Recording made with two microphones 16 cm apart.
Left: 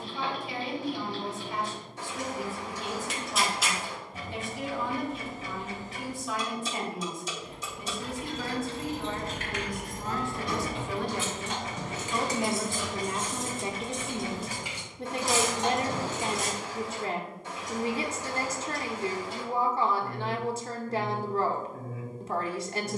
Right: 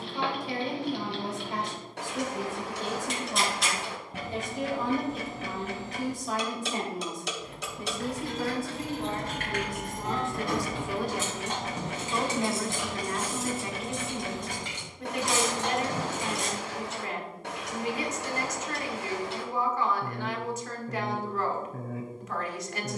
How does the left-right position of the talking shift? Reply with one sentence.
In this clip you hear the talking move from right to left.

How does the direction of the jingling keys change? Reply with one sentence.
You can hear the jingling keys travel towards the left.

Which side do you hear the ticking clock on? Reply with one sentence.
In this clip you hear the ticking clock on the right.